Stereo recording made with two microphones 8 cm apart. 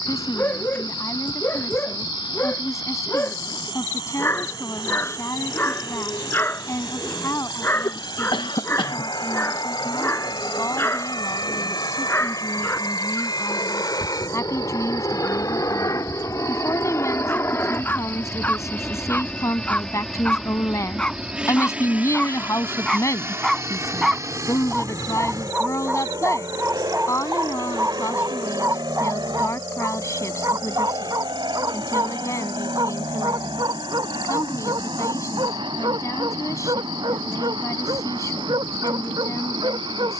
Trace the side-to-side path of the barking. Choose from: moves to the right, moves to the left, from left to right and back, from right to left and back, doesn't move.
moves to the right.